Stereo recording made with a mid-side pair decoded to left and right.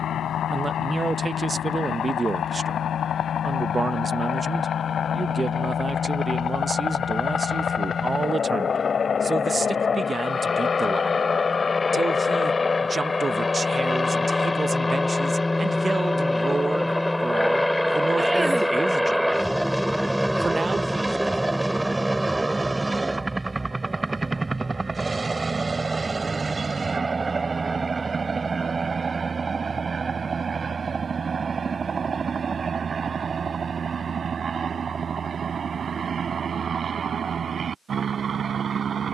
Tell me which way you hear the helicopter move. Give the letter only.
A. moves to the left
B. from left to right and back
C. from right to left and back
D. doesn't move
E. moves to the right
E.